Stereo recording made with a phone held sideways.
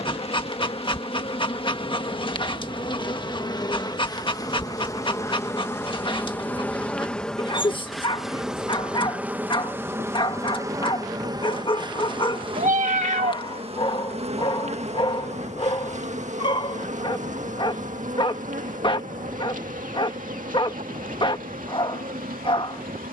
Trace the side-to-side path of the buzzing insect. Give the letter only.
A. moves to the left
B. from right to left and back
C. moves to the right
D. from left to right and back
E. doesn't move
C.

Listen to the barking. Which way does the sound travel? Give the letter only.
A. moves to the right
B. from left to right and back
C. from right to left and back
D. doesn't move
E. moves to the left
D.